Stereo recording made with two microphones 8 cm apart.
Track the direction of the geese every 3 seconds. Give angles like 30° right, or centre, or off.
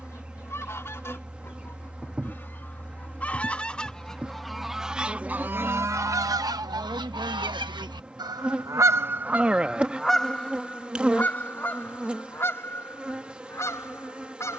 30° left, centre, 60° right, 10° left, 30° left.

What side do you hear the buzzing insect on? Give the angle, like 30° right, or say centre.
10° right.